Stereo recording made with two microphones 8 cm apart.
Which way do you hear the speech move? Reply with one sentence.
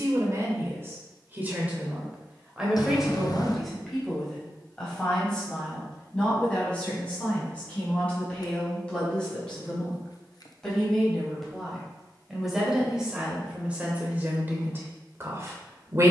You can hear the speech go left and come back.